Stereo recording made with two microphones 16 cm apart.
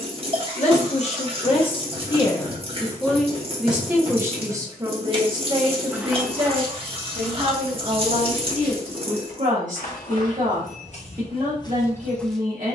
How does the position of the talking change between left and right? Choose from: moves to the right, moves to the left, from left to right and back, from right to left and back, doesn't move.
moves to the right.